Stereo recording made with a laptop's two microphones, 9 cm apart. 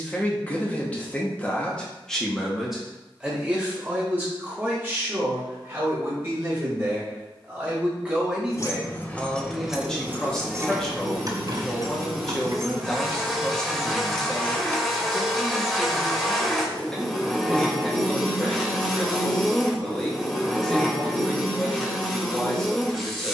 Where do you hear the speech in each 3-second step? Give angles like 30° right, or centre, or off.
10° left, 20° right, 20° right, 10° left, 10° left, 10° left, 10° left, 10° left.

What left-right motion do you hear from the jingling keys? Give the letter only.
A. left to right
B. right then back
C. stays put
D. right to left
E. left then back
B.